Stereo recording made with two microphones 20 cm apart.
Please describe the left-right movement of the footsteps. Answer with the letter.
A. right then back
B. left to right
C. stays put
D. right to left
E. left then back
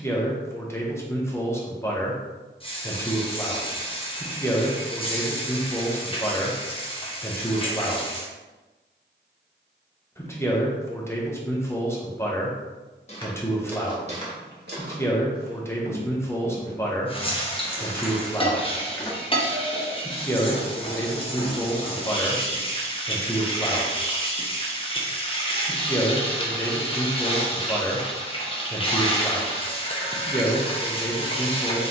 A.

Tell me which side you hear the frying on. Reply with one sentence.
You can hear the frying on the left.